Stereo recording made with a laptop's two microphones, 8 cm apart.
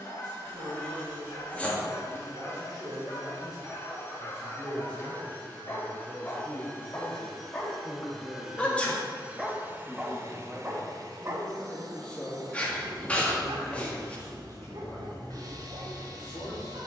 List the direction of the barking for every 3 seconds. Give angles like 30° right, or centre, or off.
40° left, 40° left, 20° left, 20° right, 70° right, 80° right.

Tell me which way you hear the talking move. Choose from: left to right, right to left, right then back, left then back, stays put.
right to left.